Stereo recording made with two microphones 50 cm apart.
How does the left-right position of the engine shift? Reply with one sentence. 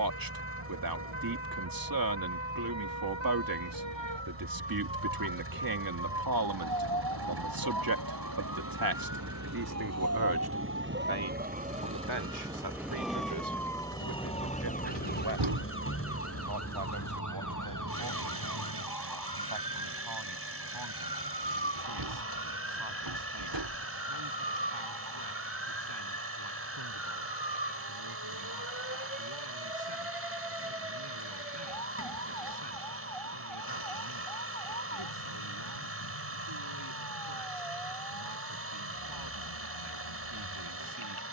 In this clip you hear the engine stay in one place.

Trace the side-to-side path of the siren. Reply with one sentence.
You can hear the siren travel towards the left.